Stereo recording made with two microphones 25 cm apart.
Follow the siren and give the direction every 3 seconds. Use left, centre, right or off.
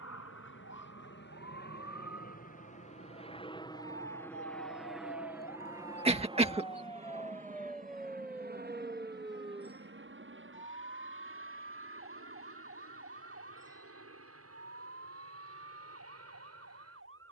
left, left, centre, right, right, right.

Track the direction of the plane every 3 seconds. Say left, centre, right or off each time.
left, centre, right, right, right, right.